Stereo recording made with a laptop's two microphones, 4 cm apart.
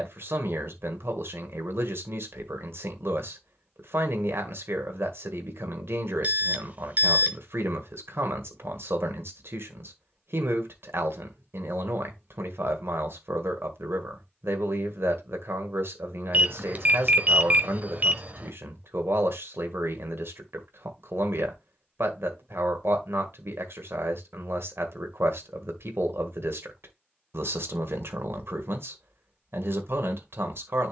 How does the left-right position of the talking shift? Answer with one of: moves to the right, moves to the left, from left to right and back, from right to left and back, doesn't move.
doesn't move.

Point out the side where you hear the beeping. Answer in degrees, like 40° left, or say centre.
40° right.